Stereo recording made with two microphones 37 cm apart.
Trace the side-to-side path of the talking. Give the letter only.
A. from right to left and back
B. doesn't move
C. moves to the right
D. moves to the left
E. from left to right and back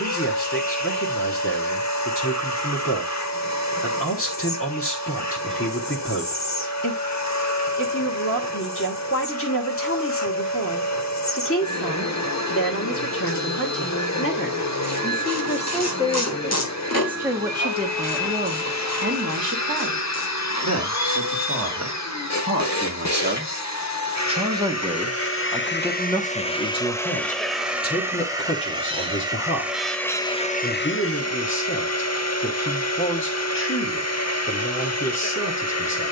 E.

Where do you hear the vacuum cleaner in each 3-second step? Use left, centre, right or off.
left, left, left, left, left, left, left, left, left, centre, left, left.